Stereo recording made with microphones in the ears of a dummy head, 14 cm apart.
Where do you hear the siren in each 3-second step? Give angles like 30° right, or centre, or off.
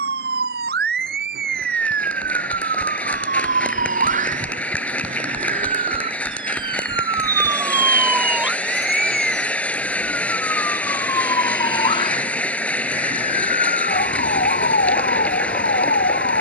60° right, 40° right, 20° right, 10° left, 40° left, 50° left.